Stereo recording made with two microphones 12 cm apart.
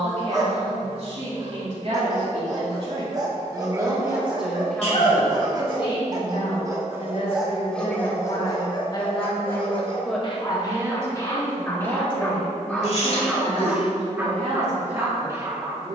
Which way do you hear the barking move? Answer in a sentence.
In this clip you hear the barking move from right to left and back again.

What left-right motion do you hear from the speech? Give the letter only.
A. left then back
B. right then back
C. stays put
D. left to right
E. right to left
A.